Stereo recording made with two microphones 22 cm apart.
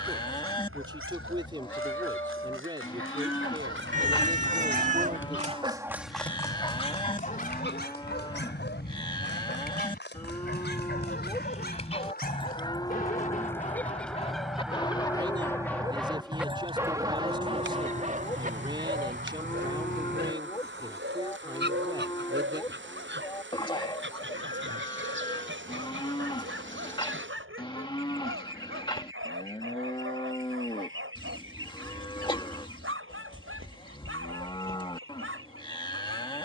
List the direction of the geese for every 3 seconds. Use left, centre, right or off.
left, left, left, left, centre, right, right, right, right, right, right, right.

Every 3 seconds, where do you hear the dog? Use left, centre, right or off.
right, right, left, left, left, centre, right, right, right, right, right, right.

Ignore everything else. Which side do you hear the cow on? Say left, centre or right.
left.